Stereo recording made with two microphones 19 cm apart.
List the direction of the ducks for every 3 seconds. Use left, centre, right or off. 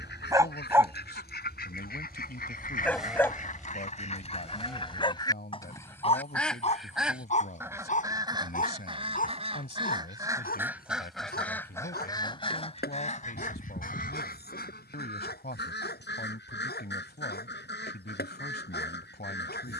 left, left, centre, centre, left, left, left.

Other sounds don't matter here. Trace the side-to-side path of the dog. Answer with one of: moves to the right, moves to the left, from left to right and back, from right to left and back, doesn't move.
moves to the left.